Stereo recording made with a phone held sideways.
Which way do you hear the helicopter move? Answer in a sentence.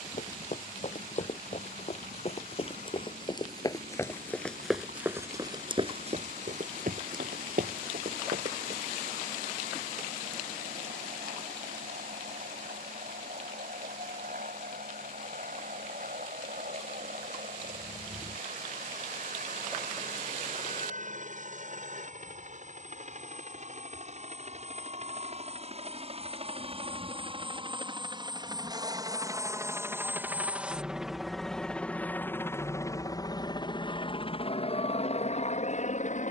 You can hear the helicopter travel towards the left.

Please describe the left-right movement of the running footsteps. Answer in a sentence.
In this clip you hear the running footsteps move to the right.